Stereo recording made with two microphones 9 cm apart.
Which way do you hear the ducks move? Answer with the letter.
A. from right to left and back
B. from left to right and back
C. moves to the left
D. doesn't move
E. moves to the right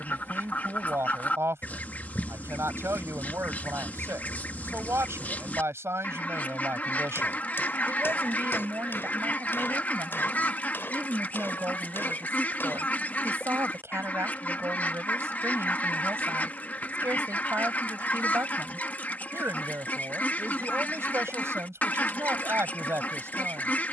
D.